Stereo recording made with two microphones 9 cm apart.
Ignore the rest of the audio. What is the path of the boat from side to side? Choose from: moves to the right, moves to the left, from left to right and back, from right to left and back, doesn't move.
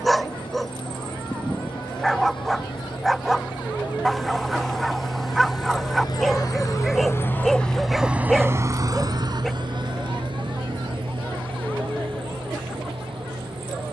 moves to the right.